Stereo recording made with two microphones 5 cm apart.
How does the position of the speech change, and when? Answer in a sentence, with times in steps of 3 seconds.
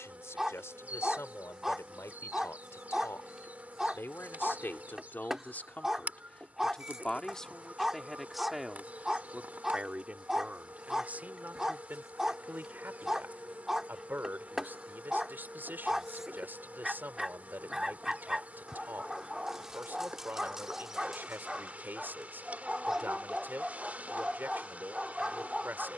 In this clip you hear the speech on the left from 0 s, in the centre from 6 s and on the right from 9 s.